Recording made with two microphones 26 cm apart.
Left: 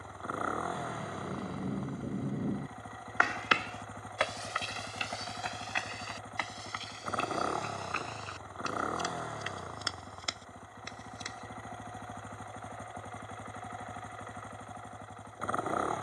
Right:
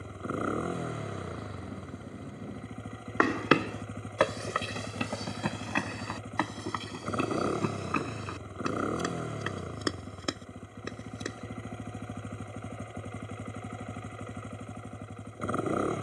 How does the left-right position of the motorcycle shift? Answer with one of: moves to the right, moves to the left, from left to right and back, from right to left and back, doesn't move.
doesn't move.